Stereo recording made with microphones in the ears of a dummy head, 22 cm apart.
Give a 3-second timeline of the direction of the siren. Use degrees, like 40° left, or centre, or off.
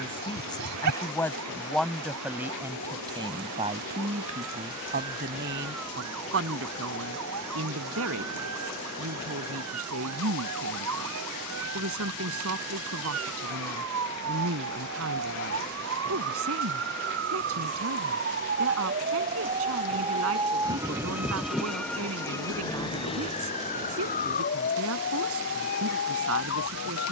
80° right, 80° right, 80° right, 70° right, 70° right, 60° right, 30° right, 10° left, 50° left.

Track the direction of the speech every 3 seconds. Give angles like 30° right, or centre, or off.
centre, 30° right, 60° right, 60° right, 60° right, 60° right, 60° right, 60° right, 60° right.